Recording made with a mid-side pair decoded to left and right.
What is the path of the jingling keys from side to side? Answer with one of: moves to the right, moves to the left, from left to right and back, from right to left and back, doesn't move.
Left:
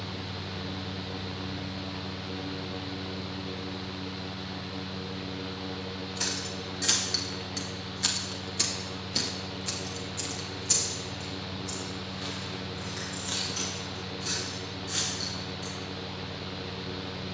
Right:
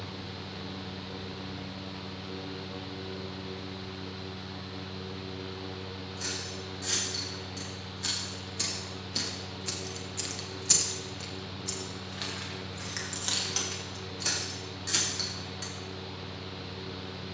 moves to the right.